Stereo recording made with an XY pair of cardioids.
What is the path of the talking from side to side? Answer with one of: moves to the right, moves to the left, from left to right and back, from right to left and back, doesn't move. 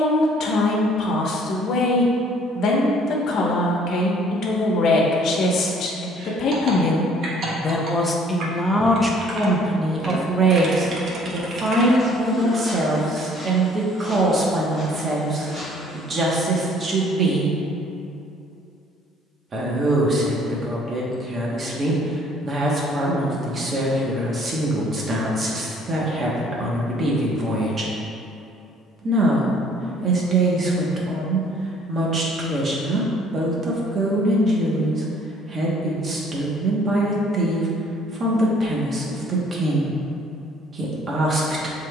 moves to the right.